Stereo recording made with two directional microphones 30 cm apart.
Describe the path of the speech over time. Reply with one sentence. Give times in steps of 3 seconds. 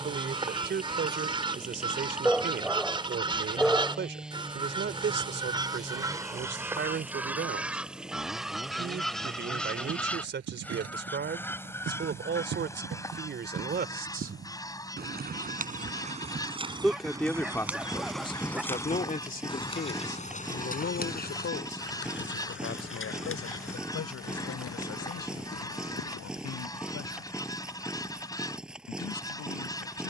In this clip you hear the speech on the right from 0 s, in the centre from 15 s and on the left from 18 s.